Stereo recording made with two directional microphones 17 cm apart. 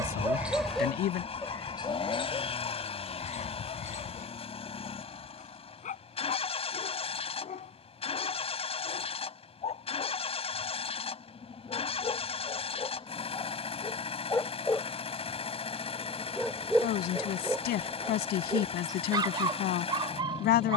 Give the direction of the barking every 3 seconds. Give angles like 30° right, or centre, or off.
20° left, 50° left, 40° left, 40° left, 20° left, centre, 20° right.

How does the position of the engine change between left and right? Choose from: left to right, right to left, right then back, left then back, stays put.
stays put.